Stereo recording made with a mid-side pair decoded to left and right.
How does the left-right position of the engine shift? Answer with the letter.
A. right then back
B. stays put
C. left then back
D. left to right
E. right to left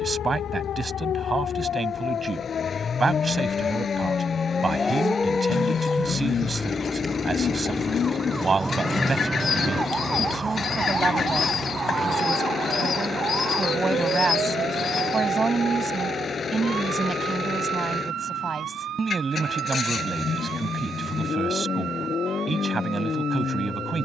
B.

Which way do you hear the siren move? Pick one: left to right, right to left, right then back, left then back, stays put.
left to right.